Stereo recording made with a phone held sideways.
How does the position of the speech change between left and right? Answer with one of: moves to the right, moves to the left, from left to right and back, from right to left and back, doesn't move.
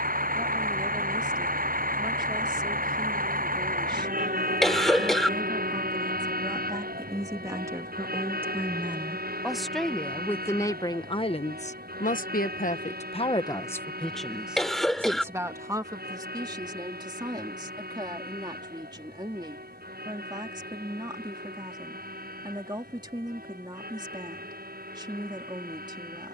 from right to left and back.